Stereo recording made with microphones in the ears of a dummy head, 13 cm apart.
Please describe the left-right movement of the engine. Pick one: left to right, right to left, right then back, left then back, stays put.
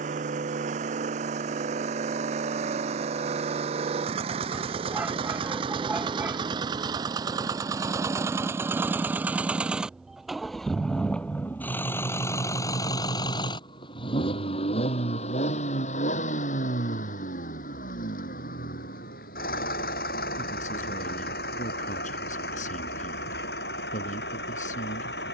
right to left.